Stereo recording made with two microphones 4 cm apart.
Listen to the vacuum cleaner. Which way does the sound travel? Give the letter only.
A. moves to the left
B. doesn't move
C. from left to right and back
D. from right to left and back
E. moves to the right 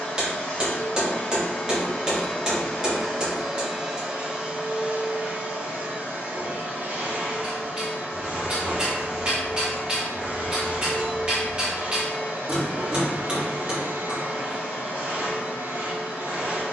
E.